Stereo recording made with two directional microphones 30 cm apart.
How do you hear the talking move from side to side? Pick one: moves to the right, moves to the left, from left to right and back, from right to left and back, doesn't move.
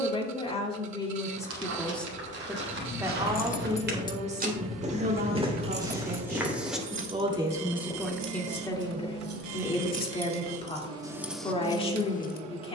from left to right and back.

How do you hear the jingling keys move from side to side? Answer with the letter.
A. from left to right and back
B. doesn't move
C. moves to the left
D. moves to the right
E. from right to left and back
A.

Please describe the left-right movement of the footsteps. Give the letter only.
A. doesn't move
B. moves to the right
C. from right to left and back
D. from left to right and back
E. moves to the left
E.